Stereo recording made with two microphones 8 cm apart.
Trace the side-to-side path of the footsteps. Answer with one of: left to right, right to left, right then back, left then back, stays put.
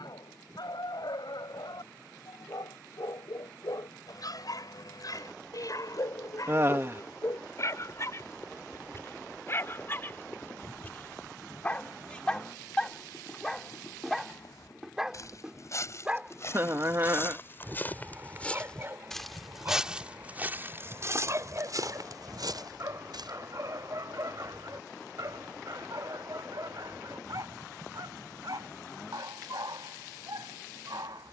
left to right.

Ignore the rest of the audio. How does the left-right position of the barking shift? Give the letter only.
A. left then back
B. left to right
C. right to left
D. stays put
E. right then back
B.